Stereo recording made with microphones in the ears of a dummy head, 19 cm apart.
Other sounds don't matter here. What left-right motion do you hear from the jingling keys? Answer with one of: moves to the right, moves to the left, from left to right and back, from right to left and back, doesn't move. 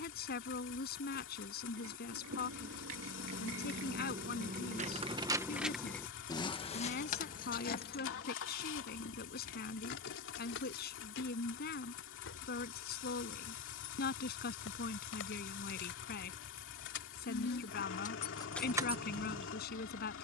from right to left and back.